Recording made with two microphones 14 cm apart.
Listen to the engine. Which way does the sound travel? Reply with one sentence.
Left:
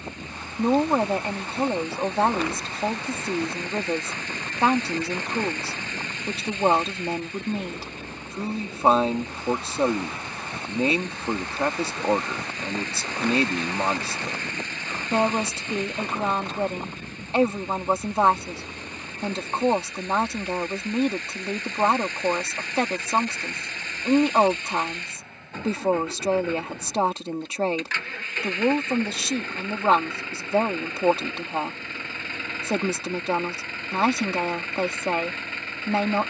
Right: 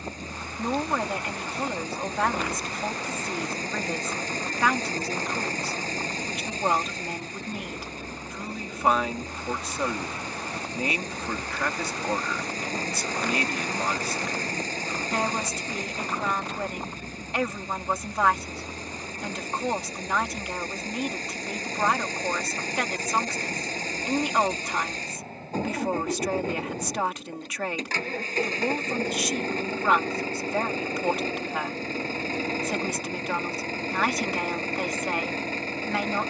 You can hear the engine stay in one place.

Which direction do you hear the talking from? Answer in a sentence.
You can hear the talking on the left.